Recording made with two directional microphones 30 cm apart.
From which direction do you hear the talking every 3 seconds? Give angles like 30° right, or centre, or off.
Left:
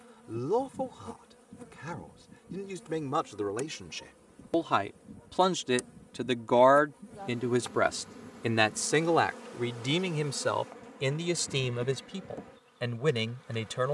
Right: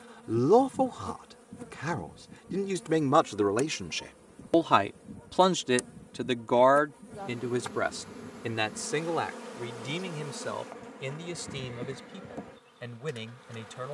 50° right, 30° right, 20° left, 50° left, 60° left.